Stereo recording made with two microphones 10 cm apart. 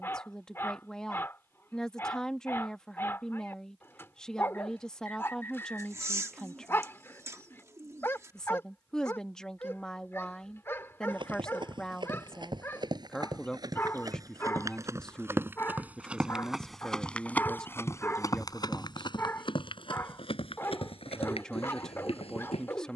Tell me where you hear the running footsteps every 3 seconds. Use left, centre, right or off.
off, off, off, right, right, centre, left, left.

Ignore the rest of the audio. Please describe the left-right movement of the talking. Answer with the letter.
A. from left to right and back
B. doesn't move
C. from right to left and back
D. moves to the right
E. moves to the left
B.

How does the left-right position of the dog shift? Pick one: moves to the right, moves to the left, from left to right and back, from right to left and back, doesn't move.
doesn't move.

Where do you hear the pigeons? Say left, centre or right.
right.